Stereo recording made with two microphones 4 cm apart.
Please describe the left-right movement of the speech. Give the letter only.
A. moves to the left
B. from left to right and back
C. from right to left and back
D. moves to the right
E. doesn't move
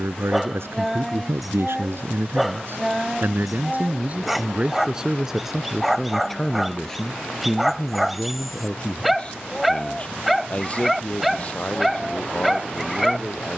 A.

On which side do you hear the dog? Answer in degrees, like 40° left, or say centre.
centre.